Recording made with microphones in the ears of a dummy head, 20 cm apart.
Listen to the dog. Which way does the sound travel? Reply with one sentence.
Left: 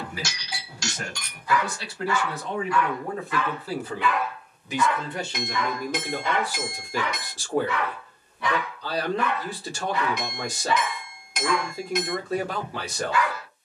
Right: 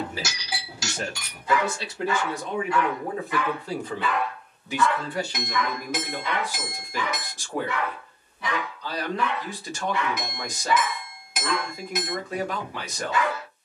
You can hear the dog go left and come back.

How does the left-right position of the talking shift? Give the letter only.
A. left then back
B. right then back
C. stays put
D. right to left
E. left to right
D.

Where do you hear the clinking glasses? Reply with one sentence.
You can hear the clinking glasses in the centre.